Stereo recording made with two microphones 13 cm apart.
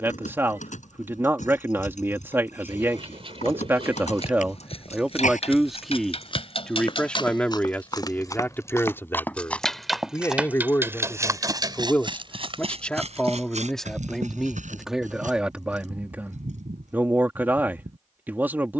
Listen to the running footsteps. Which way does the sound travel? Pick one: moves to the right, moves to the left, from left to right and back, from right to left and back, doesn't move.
moves to the right.